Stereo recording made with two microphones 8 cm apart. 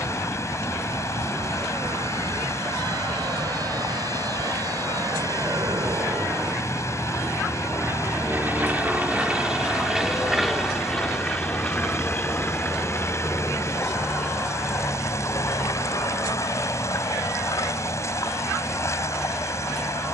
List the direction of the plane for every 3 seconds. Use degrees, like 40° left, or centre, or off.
70° right, 60° right, 30° right, centre, 30° left, 50° left, 50° left.